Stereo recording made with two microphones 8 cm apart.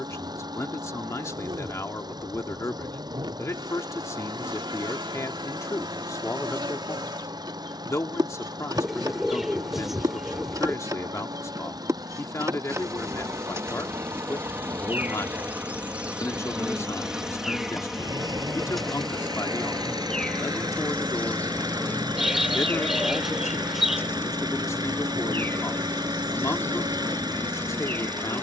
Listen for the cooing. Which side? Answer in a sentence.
In this clip you hear the cooing in the centre.